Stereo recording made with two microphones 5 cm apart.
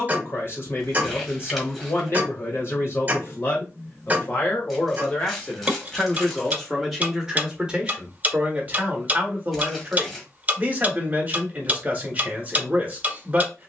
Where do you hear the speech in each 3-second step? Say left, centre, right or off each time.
left, left, centre, right, right.